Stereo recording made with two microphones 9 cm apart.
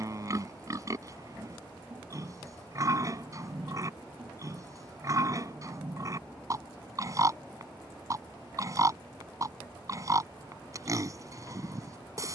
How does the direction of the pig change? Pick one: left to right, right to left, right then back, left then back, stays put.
stays put.